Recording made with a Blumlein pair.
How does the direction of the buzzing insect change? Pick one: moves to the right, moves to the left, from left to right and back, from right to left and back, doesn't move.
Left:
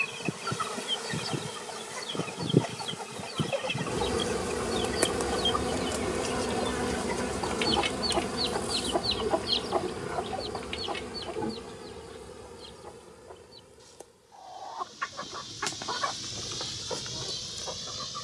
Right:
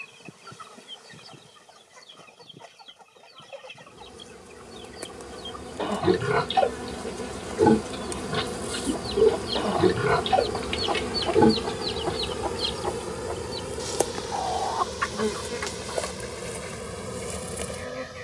moves to the right.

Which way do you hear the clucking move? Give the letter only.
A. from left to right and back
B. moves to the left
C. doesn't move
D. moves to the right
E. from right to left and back
A.